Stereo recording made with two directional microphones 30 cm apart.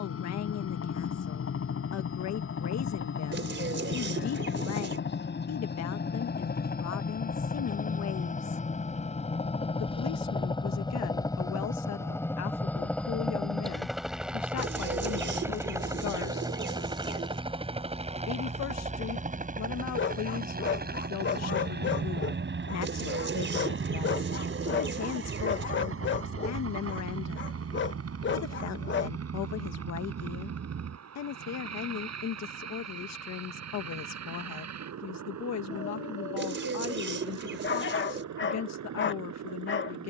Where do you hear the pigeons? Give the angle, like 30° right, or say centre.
40° right.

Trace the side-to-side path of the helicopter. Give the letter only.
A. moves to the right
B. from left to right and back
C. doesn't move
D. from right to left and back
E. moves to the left
A.